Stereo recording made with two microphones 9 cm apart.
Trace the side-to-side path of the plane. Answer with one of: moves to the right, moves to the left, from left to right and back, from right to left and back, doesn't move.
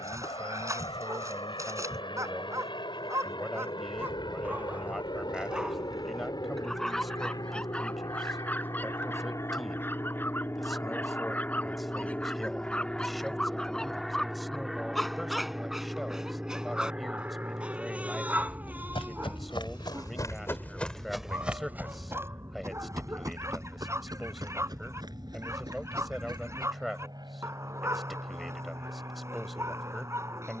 moves to the right.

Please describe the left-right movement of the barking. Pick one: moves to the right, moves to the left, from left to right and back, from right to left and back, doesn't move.
from right to left and back.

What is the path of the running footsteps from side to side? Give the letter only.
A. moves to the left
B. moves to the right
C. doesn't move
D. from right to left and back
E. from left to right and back
B.